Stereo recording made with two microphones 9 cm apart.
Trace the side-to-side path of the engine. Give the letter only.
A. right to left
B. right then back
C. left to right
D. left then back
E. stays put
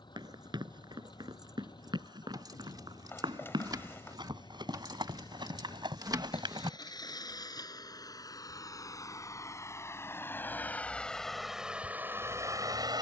C.